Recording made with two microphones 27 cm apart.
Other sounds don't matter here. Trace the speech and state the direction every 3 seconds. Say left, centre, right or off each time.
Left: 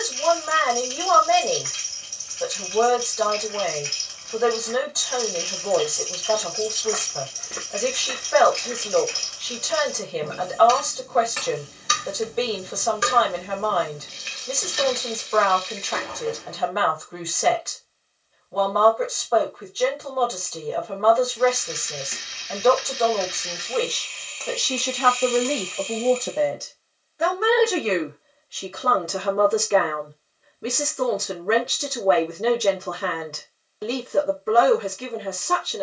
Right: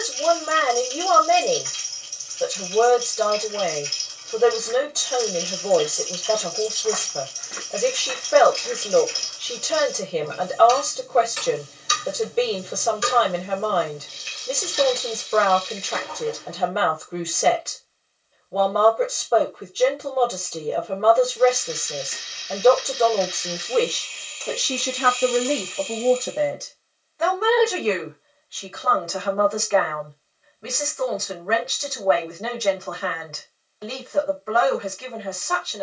right, right, right, right, right, right, right, right, centre, left, left, left.